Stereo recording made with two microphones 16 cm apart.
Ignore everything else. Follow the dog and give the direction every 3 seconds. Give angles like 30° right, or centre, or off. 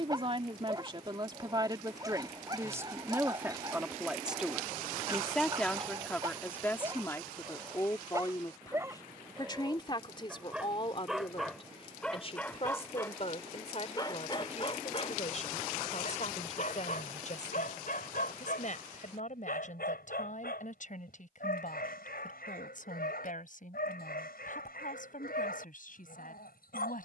30° right, 30° right, 20° right, 10° right, 20° left, 60° left, 70° left, 80° left, 80° left.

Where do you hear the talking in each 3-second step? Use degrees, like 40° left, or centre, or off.
30° right, centre, 20° left, 30° left, 40° left, 50° left, 50° left, 60° left, 60° left.